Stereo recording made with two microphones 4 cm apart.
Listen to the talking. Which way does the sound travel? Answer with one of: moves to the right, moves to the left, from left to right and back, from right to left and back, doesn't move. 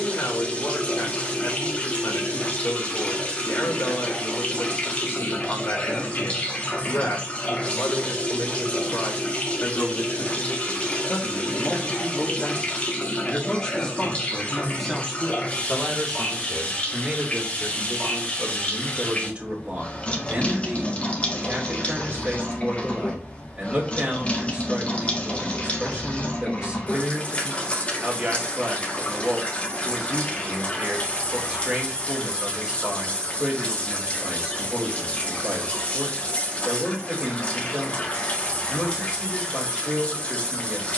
moves to the right.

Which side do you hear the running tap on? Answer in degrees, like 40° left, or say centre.
30° left.